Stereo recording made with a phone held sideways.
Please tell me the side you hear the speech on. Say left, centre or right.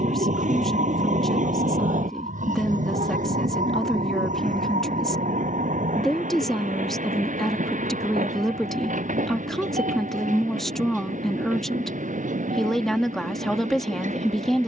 centre.